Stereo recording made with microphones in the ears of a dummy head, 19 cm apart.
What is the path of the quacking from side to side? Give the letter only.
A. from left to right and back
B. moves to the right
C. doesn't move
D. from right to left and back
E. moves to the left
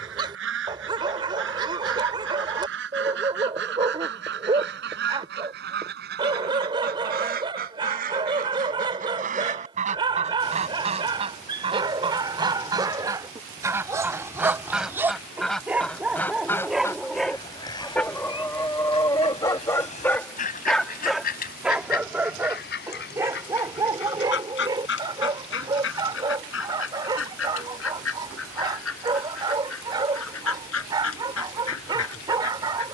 E.